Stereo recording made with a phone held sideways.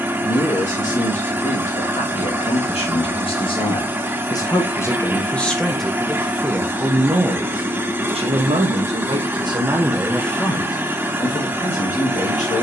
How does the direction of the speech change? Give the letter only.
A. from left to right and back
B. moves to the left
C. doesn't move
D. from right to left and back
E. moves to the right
A.